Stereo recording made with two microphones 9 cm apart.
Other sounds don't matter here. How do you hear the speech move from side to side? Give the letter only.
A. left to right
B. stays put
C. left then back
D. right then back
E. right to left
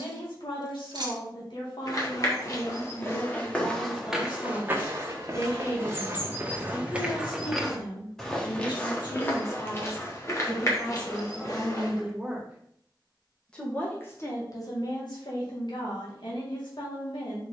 D.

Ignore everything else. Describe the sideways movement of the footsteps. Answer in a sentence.
You can hear the footsteps move from left to right and back again.